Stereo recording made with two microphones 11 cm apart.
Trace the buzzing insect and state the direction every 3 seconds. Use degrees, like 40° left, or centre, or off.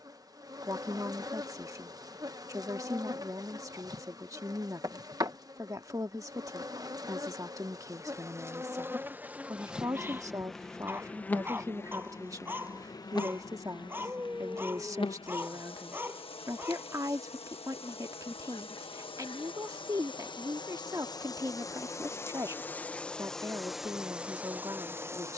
40° right, 40° right, 30° right, centre, 40° left, 60° left, 50° left, 20° left, 20° right.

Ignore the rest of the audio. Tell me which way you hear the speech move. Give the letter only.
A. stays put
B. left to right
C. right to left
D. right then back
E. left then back
A.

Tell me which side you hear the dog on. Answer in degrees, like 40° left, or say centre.
20° right.